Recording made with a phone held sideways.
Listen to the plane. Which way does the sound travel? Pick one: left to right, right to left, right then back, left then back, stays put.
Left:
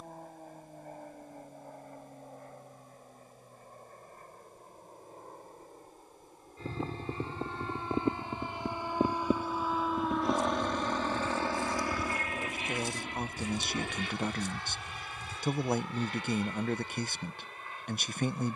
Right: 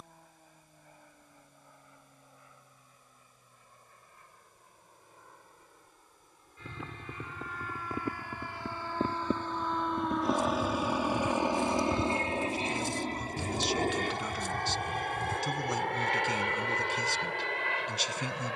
left to right.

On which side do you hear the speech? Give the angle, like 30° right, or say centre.
50° left.